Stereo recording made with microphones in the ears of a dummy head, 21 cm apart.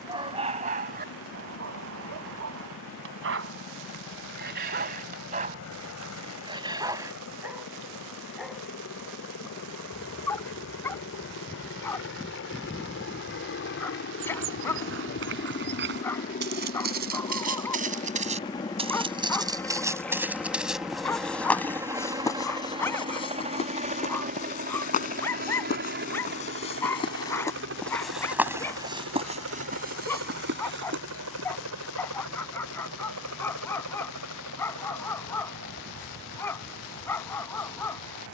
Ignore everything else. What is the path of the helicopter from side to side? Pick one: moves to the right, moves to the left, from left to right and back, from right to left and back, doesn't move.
moves to the right.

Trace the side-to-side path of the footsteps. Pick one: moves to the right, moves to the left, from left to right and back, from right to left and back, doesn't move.
from right to left and back.